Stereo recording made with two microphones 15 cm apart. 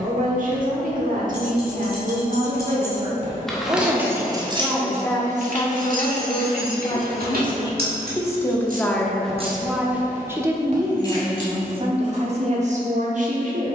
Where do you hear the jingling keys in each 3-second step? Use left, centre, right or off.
left, right, right, centre, off.